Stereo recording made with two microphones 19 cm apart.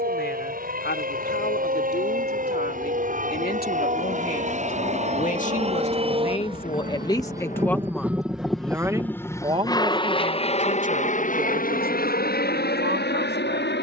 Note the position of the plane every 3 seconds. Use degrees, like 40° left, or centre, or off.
60° right, 50° right, 20° right, 30° left, 60° left.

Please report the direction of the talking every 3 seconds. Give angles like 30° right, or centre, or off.
70° left, 50° left, 20° left, 40° right, 60° right.